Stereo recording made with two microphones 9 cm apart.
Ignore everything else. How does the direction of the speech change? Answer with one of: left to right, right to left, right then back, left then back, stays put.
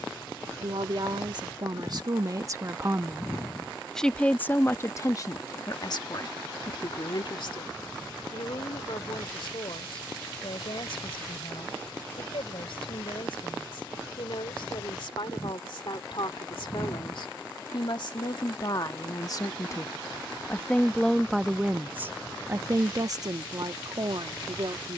left then back.